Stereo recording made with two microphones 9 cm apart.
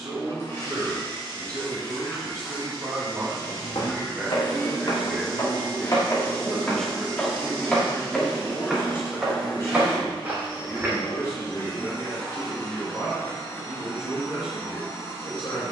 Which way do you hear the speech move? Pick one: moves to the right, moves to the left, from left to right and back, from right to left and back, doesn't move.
moves to the left.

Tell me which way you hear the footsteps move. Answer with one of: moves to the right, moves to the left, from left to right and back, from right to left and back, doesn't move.
moves to the right.